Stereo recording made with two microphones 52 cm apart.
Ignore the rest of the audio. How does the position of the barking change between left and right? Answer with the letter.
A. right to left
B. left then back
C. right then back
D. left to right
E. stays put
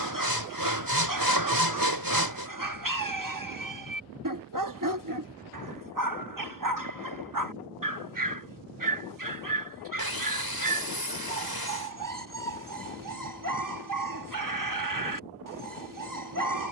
E.